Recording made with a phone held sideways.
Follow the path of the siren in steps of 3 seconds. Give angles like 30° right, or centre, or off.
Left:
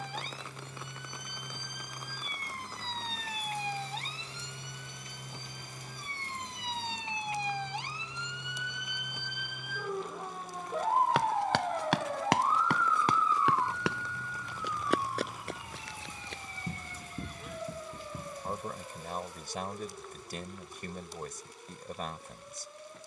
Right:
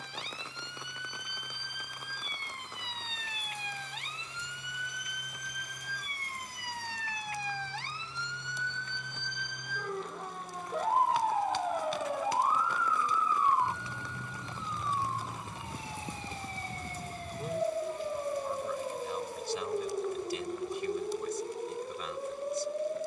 40° left, 30° left, 20° left, centre, 20° right, 30° right, 40° right, 50° right.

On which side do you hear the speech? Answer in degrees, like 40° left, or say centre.
50° left.